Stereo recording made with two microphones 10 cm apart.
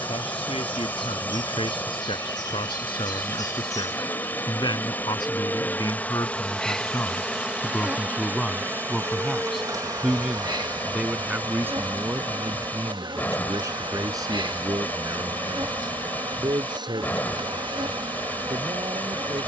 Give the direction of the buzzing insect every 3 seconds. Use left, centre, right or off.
left, left, centre, right, right, right, right.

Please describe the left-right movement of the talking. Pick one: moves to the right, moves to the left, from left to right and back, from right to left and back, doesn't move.
moves to the right.